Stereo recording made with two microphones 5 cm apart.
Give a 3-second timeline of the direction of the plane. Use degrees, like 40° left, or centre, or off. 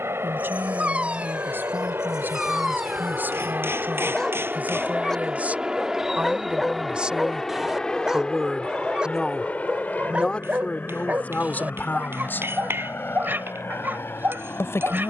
60° right, 30° right, 10° left, 30° left, 50° left.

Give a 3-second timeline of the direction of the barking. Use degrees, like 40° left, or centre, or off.
20° right, 10° left, 10° right, 30° right, 50° right.